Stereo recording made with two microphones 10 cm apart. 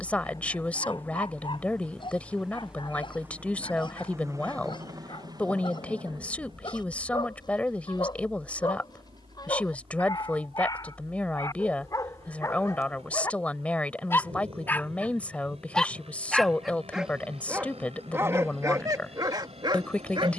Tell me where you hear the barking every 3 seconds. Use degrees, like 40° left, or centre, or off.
50° left, 50° left, 50° left, 40° left, 30° left, 10° right, 40° right.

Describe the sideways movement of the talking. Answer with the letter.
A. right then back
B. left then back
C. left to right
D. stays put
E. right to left
D.